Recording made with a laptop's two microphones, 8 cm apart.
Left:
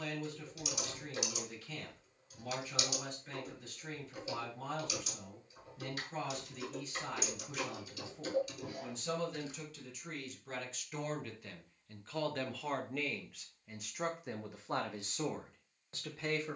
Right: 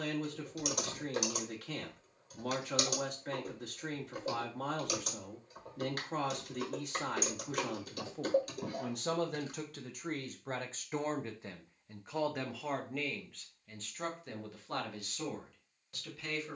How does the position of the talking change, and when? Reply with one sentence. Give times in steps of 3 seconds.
You can hear the talking on the right from 0 s, in the centre from 12 s and on the left from 15 s.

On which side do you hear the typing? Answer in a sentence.
In this clip you hear the typing on the right.